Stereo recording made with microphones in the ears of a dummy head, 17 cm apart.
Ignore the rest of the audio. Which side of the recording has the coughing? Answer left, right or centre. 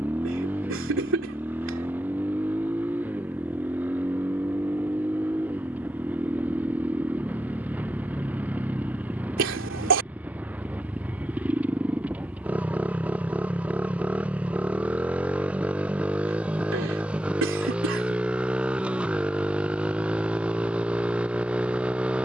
right.